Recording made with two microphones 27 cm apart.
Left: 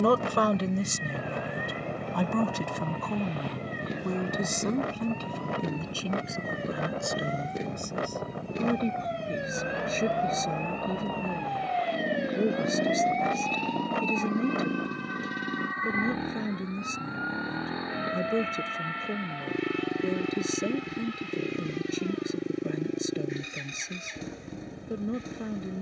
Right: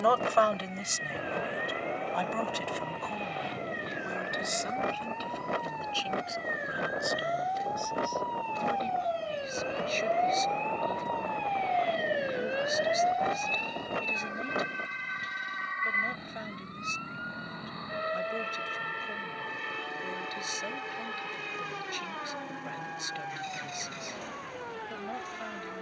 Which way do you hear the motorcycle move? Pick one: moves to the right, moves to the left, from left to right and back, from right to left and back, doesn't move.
doesn't move.